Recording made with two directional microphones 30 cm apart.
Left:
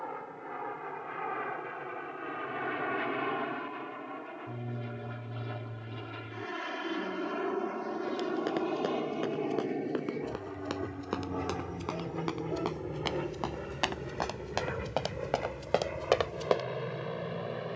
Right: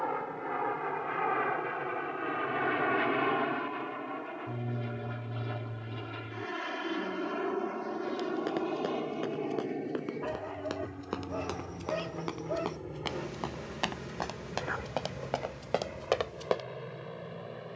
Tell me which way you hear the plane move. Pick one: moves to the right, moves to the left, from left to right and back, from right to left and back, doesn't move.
moves to the left.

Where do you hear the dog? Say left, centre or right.
right.